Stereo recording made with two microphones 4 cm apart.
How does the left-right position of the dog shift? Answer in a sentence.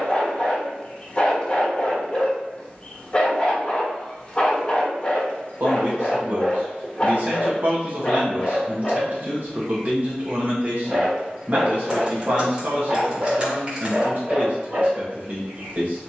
You can hear the dog go from the left side to the right.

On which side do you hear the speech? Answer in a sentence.
You can hear the speech on the right.